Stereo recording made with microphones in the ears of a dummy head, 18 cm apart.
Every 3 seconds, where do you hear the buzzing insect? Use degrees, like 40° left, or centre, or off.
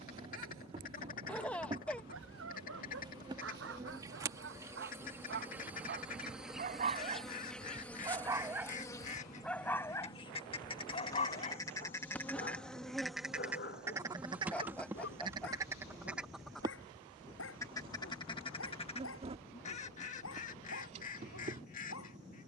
30° right, 10° right, centre, 20° left, centre, 20° right, 30° right, 30° right.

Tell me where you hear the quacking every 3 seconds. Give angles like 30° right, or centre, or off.
40° left, 40° left, 40° left, 30° left, 10° right, centre, 30° left, 40° left.